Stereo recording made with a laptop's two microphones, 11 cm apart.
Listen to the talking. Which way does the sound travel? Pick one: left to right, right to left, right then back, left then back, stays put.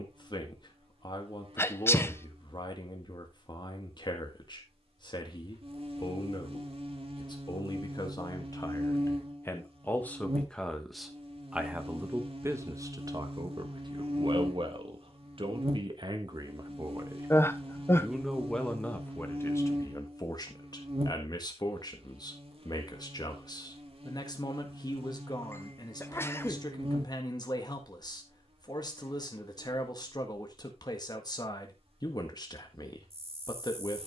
right then back.